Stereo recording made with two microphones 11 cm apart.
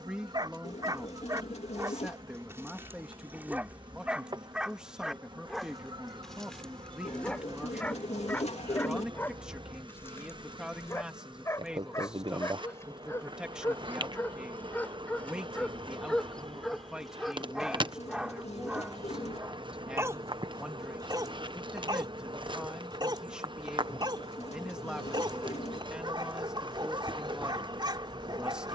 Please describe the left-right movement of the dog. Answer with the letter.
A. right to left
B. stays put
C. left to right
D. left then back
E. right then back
D.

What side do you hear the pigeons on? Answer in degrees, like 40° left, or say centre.
90° left.